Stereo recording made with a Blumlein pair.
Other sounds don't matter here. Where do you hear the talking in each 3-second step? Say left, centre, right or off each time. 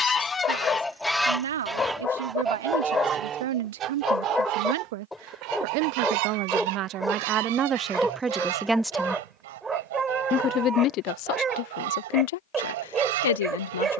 right, right, right, left, left.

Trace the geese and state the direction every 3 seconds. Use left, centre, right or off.
centre, right, right, right, right.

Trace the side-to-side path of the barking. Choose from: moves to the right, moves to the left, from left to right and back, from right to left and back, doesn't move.
moves to the right.